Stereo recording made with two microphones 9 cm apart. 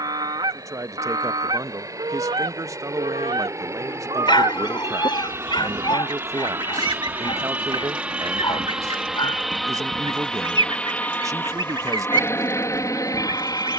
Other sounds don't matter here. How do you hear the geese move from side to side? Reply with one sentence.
You can hear the geese stay in one place.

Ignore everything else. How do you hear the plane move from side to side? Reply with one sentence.
You can hear the plane travel towards the left.